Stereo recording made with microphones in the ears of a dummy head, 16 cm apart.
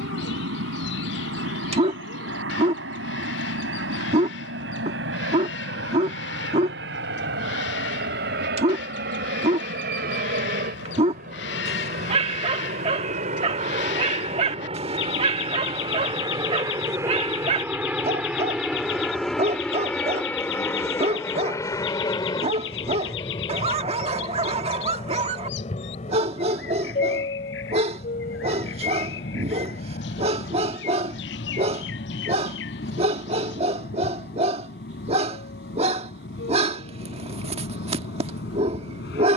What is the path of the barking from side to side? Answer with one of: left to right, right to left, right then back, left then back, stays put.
stays put.